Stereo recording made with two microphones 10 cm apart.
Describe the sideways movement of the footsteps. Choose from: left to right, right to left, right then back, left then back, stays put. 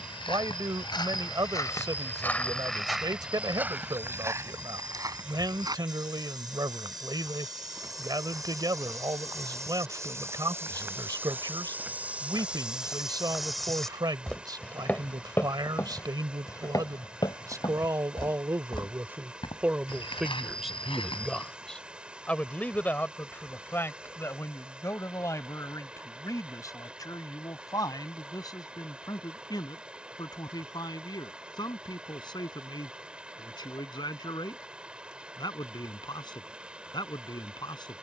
right then back.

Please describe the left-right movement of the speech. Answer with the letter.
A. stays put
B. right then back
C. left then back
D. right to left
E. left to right
D.